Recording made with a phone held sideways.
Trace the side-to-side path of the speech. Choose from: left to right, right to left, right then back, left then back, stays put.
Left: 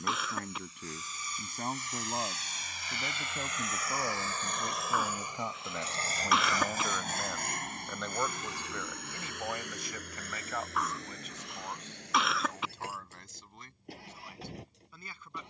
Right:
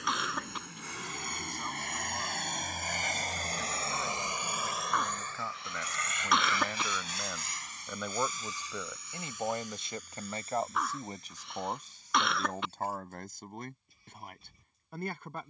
left to right.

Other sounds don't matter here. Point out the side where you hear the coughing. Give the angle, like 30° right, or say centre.
centre.